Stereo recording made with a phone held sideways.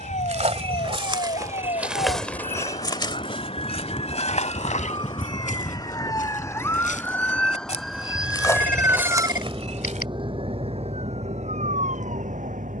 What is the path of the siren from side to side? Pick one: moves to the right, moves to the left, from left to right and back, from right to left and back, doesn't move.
moves to the right.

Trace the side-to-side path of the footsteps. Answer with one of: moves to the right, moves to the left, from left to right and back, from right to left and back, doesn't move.
from right to left and back.